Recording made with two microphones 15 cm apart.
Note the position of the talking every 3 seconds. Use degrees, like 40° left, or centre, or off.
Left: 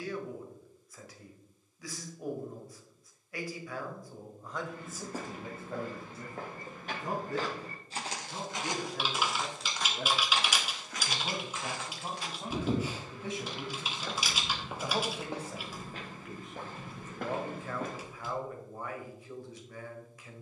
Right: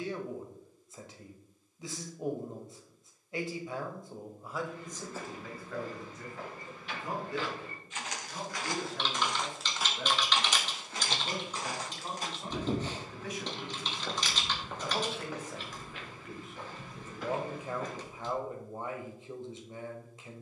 30° right, centre, 40° left, 40° left, 30° left, centre, 30° right.